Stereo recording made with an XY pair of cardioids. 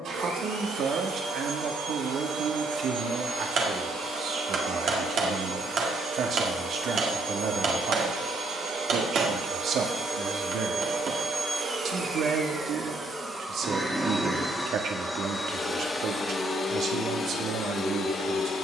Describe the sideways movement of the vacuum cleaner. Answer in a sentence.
In this clip you hear the vacuum cleaner go from the right side to the left.